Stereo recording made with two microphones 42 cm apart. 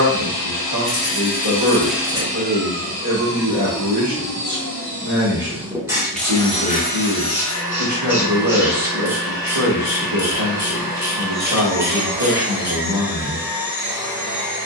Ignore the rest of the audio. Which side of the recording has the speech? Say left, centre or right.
right.